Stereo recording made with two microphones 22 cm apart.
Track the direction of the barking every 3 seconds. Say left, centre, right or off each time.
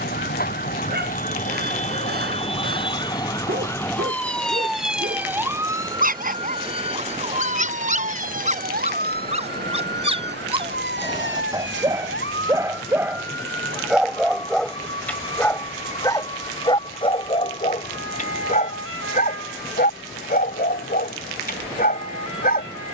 right, right, right, right, centre, left, left, left.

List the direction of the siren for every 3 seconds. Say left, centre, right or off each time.
left, centre, right, right, right, right, right, right.